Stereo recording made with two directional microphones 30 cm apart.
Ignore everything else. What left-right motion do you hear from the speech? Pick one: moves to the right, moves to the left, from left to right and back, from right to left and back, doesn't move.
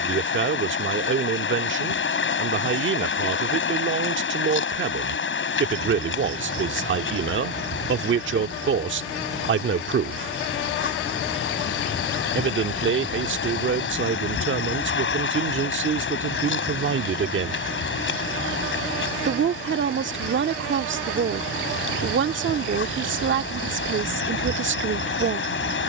doesn't move.